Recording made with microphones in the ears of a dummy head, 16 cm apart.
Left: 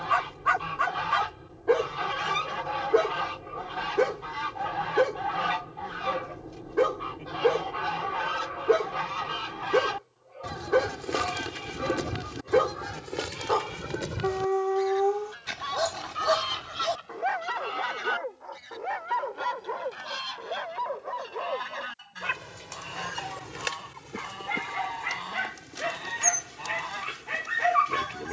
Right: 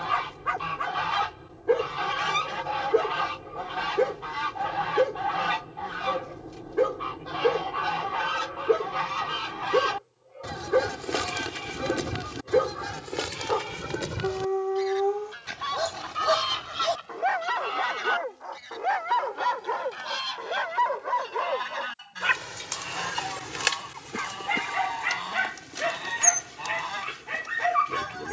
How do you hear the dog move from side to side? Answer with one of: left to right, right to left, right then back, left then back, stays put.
right then back.